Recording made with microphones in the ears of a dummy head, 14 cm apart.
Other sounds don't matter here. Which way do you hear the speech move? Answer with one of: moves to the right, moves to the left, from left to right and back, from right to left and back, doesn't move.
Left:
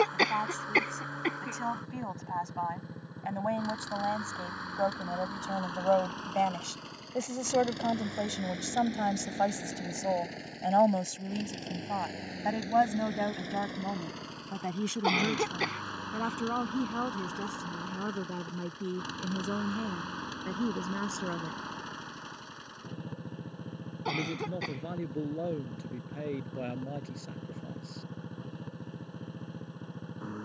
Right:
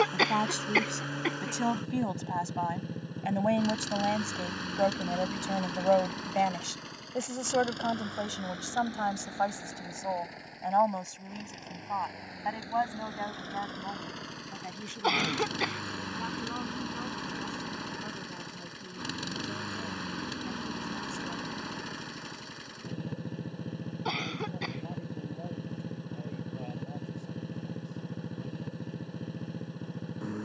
moves to the left.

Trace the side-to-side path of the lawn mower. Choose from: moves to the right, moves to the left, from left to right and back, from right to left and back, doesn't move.
from right to left and back.